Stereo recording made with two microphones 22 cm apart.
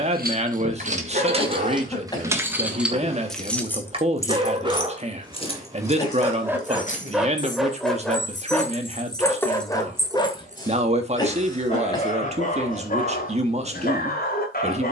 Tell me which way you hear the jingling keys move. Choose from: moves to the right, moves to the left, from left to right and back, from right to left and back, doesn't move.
from right to left and back.